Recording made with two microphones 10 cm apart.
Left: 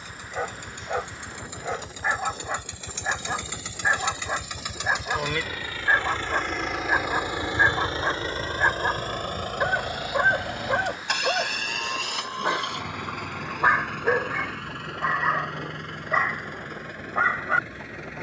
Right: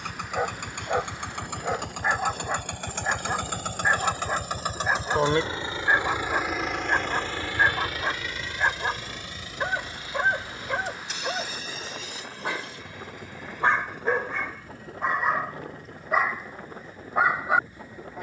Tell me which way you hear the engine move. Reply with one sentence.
You can hear the engine travel towards the left.